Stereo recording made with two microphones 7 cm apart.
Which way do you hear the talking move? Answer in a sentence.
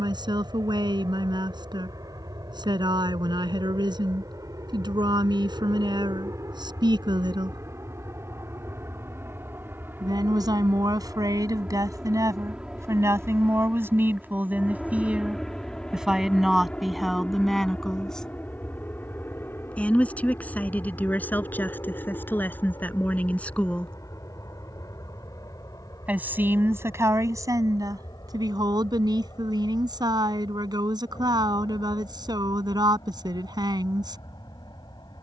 You can hear the talking move from right to left and back again.